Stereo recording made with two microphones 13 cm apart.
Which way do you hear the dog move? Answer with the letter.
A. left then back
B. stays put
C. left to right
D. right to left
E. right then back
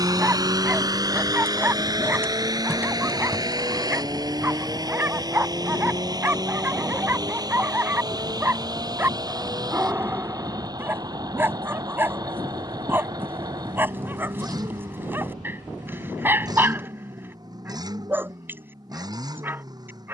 B.